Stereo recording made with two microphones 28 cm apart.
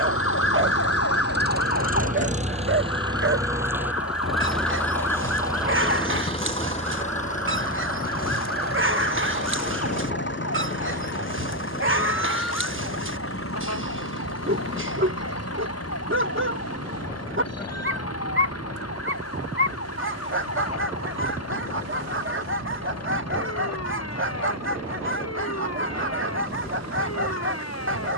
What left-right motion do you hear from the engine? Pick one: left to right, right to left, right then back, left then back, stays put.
right to left.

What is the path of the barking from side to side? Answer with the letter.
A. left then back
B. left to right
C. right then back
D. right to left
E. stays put
E.